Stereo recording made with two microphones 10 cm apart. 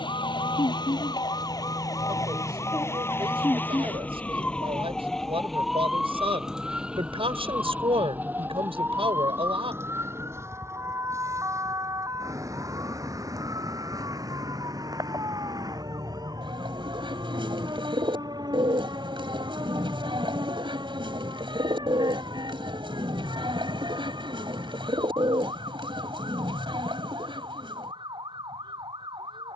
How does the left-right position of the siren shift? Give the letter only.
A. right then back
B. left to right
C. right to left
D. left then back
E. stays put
B.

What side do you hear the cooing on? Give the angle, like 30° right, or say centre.
60° right.